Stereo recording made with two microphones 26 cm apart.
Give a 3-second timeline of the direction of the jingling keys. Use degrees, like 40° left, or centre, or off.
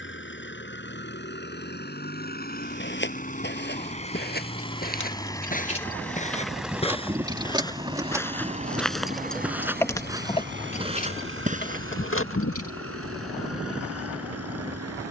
off, 30° left, 10° right, 20° left, 60° left.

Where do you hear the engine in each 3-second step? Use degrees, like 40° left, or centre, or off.
40° left, 20° left, 10° right, 40° right, 60° right.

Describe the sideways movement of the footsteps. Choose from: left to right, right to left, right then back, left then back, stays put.
left to right.